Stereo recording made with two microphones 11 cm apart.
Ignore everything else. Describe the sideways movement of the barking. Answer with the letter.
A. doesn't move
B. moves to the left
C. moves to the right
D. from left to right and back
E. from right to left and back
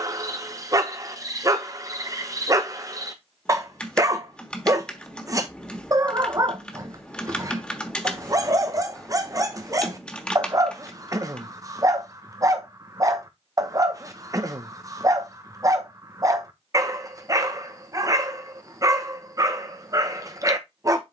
A.